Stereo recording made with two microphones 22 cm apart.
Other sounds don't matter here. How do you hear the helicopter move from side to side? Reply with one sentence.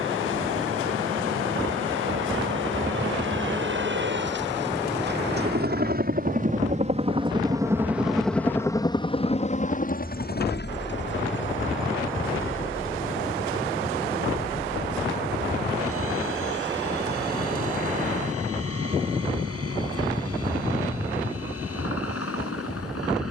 In this clip you hear the helicopter move to the left.